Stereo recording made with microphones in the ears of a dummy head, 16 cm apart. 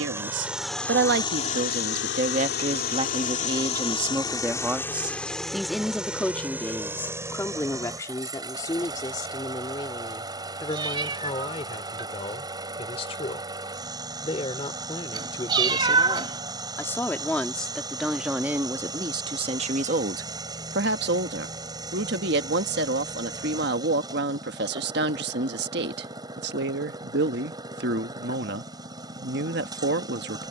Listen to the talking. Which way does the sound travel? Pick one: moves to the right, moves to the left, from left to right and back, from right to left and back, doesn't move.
from right to left and back.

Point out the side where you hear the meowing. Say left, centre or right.
right.